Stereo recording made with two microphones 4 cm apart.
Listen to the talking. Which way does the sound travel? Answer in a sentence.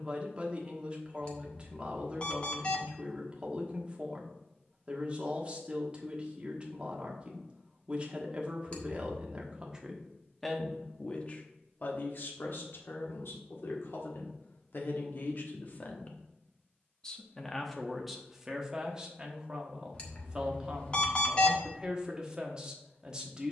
You can hear the talking move from right to left and back again.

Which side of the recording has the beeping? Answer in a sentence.
In this clip you hear the beeping on the left.